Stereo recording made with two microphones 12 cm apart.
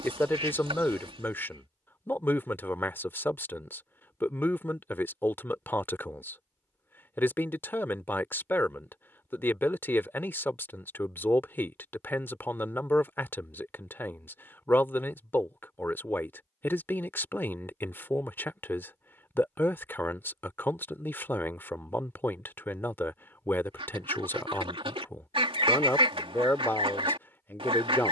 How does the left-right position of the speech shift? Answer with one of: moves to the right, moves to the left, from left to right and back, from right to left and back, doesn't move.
doesn't move.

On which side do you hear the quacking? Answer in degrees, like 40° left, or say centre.
40° right.